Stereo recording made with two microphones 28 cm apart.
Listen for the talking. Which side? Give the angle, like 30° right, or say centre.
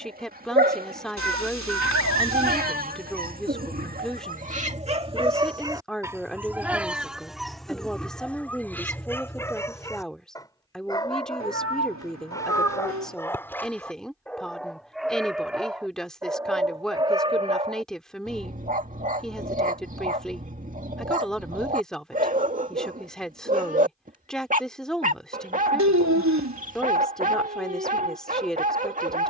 centre.